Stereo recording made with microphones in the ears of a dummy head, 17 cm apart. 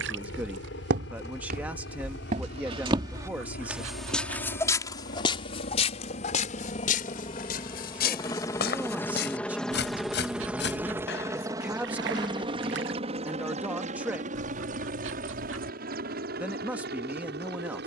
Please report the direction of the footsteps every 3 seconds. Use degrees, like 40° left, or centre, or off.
50° right, 10° left, 50° left, 60° left, off, off.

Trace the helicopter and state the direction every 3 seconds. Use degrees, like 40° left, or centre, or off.
60° left, 50° left, 30° left, 10° right, 30° right, 50° right.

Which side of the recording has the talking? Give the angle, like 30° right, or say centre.
10° right.